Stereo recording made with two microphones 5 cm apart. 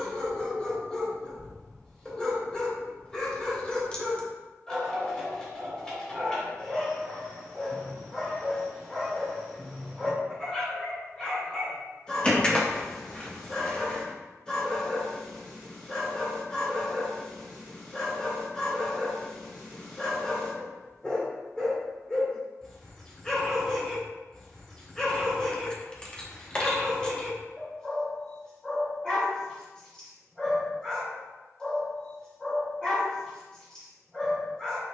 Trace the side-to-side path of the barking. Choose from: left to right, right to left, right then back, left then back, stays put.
stays put.